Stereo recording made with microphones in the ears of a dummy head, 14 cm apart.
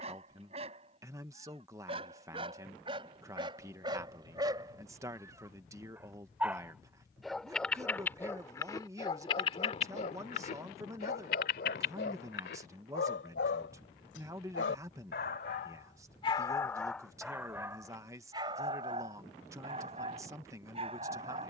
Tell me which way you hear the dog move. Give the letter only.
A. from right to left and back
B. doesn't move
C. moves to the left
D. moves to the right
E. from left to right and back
A.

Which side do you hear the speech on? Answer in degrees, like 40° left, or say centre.
20° right.